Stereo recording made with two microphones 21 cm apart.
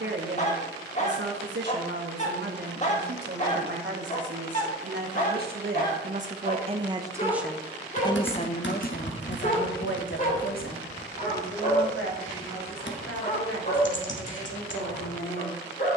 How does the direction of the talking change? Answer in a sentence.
You can hear the talking go from the right side to the left.